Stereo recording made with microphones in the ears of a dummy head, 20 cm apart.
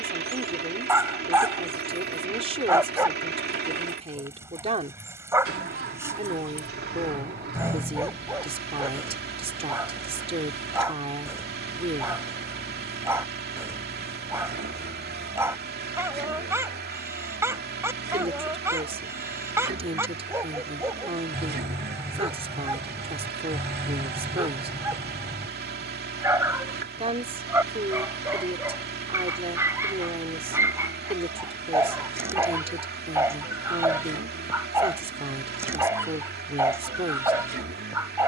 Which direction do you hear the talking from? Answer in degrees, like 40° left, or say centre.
30° right.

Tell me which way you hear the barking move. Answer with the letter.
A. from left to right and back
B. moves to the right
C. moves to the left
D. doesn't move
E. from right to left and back
D.